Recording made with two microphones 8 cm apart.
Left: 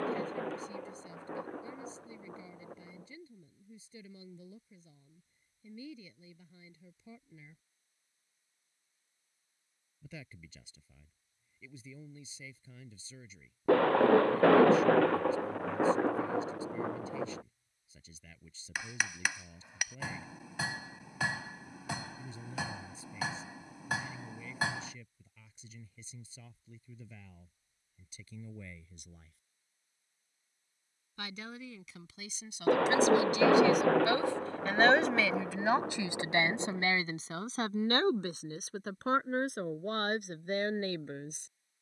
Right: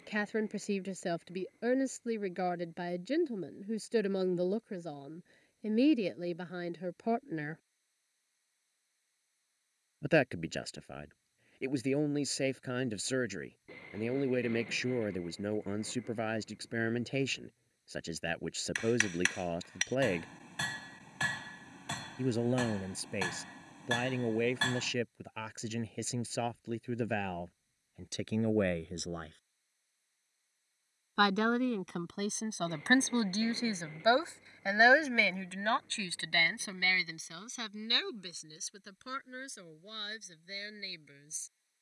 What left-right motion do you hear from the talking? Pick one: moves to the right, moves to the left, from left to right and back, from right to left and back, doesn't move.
moves to the left.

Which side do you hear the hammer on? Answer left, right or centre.
centre.